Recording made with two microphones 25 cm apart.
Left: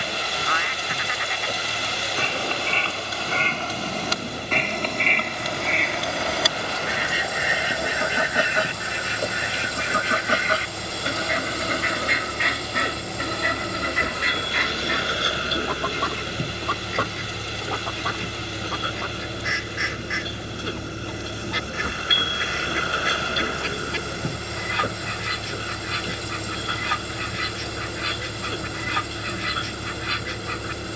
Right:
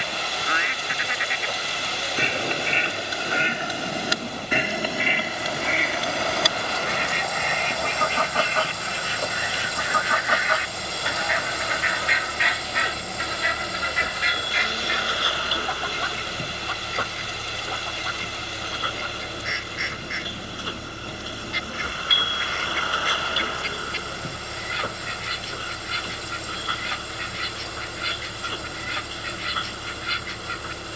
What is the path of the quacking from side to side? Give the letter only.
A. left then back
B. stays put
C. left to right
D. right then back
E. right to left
E.